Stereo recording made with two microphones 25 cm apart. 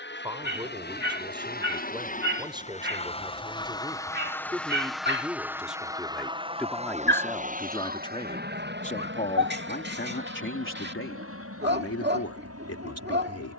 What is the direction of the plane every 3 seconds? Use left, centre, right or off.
left, centre, right, right, right.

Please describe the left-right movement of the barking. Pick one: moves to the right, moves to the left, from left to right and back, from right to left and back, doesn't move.
doesn't move.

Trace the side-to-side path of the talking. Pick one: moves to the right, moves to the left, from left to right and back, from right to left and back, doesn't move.
moves to the left.